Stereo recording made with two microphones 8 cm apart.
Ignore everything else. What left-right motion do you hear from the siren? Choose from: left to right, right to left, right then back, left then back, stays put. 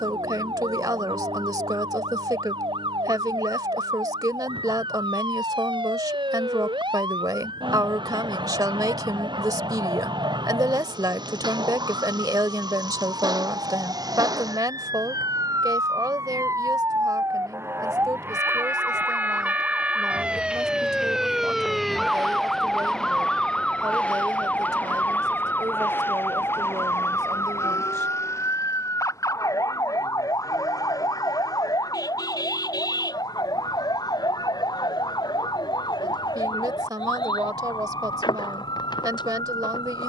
right to left.